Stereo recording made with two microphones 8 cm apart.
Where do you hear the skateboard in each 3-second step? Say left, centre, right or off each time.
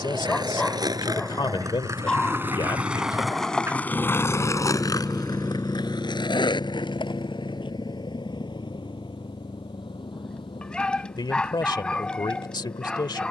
right, left, left, off, off.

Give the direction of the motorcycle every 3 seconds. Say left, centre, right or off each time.
right, centre, left, left, left.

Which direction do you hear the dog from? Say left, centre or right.
centre.